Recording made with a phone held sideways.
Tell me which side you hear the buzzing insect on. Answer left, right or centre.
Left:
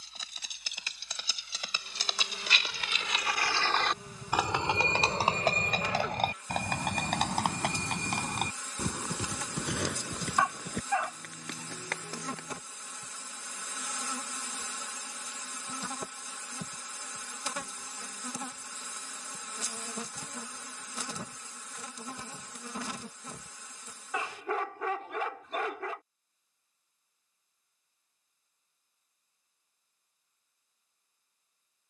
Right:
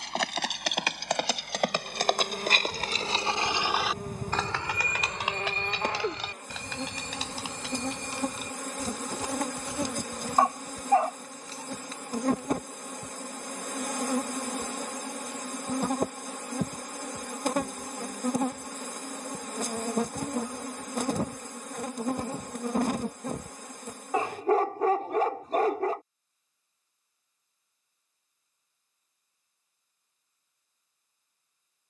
right.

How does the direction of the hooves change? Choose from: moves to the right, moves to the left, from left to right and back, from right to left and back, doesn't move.
moves to the left.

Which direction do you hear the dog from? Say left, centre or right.
right.